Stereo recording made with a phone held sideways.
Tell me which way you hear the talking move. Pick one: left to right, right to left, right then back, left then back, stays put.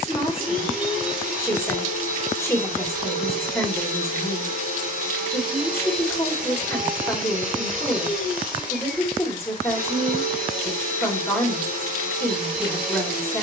stays put.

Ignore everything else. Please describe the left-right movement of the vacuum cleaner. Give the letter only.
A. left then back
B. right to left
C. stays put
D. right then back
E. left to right
C.